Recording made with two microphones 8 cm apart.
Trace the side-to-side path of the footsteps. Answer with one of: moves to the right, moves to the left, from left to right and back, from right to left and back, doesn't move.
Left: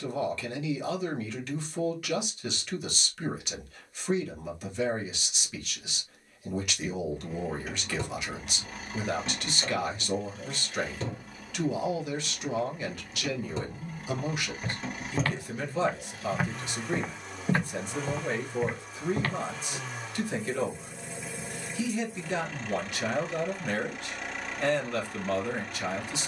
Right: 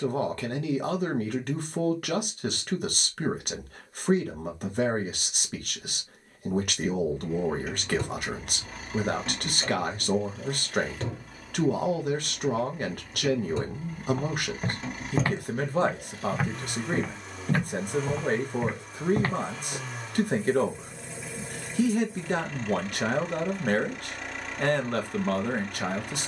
from right to left and back.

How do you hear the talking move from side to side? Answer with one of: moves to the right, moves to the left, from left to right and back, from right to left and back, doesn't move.
doesn't move.